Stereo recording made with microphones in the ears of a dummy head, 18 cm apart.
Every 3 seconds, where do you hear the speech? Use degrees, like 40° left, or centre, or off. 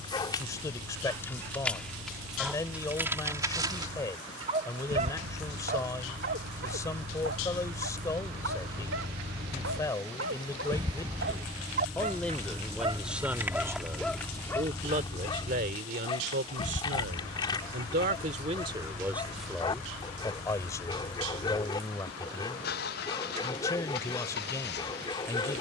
20° left, 20° left, 20° left, 20° left, 10° right, 50° right, 10° right, 20° left, 20° left.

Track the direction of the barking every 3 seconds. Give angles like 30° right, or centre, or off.
10° left, 30° right, 60° right, 60° right, 10° right, 20° left, 20° left, 20° left, 20° left.